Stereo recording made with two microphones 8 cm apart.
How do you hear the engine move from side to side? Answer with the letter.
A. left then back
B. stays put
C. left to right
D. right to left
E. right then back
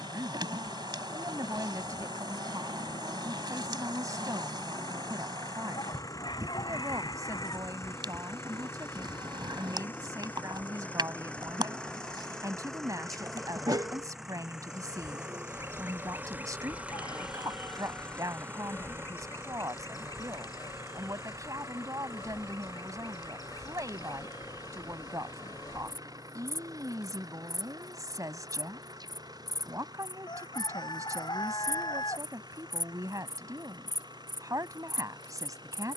C.